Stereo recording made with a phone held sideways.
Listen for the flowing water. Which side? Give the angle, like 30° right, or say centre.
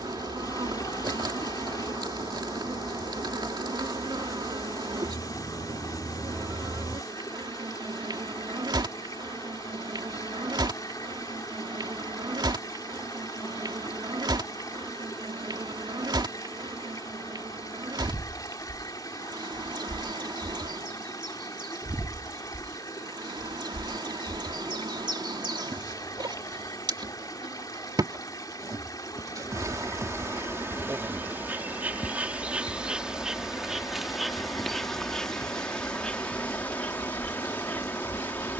20° left.